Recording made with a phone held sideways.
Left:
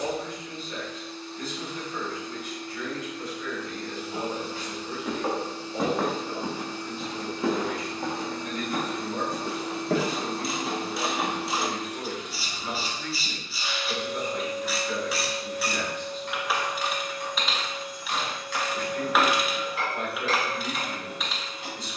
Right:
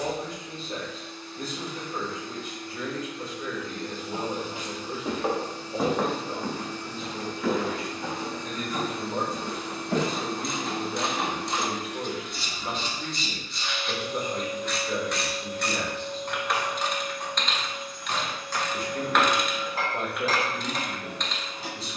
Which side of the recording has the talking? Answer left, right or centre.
right.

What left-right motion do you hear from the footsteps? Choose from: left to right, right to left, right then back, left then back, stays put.
right to left.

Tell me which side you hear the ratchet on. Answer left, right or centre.
centre.